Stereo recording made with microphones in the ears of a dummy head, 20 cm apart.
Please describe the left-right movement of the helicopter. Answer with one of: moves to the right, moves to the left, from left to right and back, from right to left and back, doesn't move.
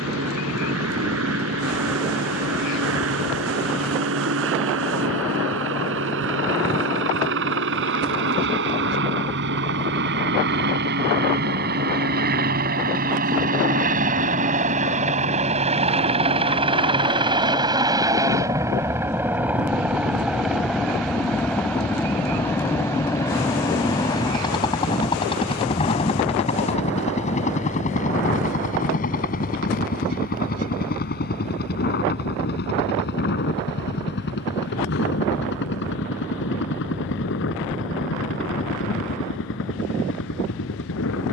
moves to the left.